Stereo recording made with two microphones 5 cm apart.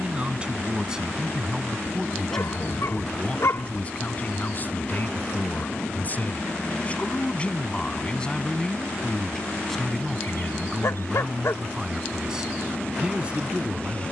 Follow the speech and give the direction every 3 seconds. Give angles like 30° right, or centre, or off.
10° right, 30° left, 20° left, centre, 20° right.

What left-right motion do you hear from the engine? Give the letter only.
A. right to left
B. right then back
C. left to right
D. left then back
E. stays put
E.